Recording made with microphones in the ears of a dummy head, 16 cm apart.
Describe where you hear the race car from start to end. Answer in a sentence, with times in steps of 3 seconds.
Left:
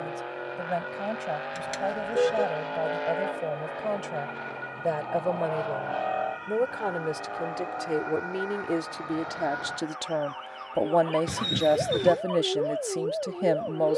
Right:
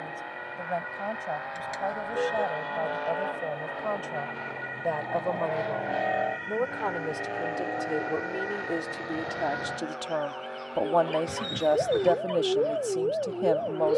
You can hear the race car on the left from 0 s, in the centre from 3 s and on the right from 6 s.